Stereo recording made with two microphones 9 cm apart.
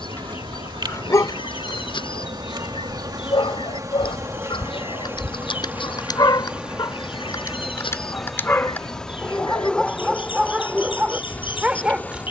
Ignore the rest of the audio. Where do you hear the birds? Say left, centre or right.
left.